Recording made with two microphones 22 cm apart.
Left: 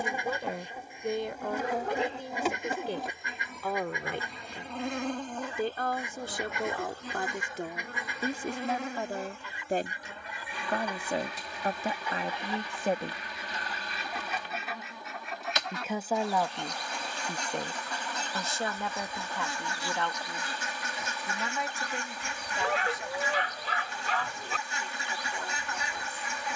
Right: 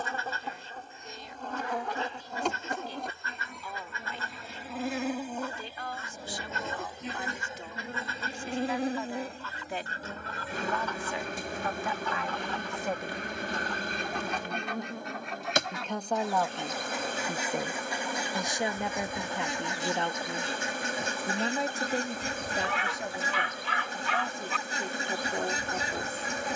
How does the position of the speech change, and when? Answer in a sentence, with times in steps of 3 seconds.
You can hear the speech on the left from 0 s, in the centre from 15 s and on the right from 18 s.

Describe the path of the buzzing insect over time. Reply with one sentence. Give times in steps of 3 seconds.
You can hear the buzzing insect in the centre from 0 s and on the right from 6 s.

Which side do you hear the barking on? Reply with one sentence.
In this clip you hear the barking on the left.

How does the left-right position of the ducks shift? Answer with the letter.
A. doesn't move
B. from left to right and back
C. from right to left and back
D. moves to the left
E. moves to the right
E.